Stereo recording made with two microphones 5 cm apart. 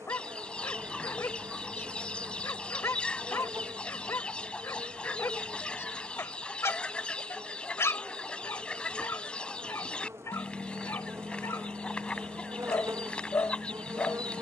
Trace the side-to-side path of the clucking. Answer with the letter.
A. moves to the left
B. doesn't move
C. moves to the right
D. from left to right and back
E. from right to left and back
B.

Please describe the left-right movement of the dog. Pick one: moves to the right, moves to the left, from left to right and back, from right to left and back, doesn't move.
doesn't move.